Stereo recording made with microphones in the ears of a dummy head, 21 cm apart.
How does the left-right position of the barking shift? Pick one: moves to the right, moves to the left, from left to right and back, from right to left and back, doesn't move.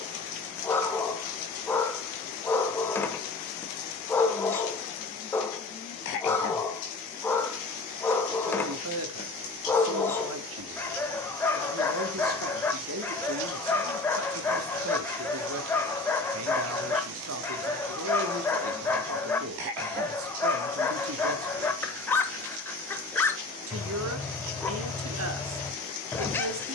doesn't move.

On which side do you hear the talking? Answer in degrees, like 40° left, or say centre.
60° right.